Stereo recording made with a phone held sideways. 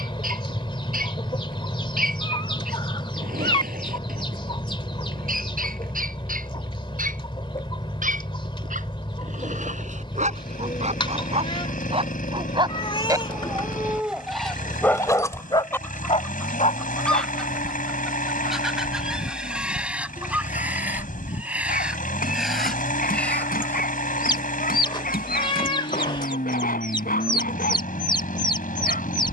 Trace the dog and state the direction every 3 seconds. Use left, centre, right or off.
right, right, right, right, centre, left, left, left, left, left.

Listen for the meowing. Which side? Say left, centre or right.
left.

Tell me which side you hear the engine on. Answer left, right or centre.
left.